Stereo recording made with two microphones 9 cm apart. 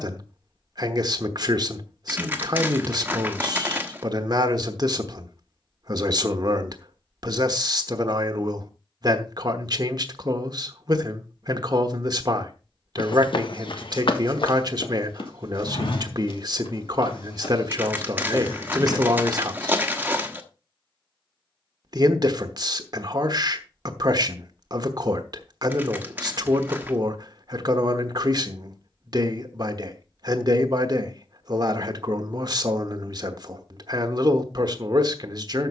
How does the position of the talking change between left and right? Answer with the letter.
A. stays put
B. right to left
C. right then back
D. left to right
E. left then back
A.